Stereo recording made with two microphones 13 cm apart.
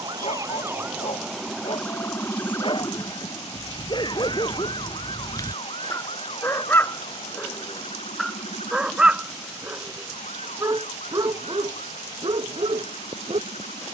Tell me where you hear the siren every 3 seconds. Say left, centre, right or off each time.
centre, left, left, left, left.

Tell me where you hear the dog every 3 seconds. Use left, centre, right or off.
left, left, centre, right, right.